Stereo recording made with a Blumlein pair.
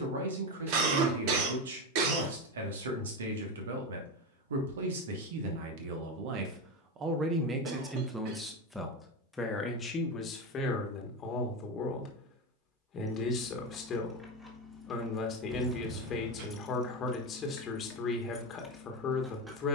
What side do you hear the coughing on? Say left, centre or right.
right.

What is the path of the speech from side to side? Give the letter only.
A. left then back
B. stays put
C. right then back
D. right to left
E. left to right
D.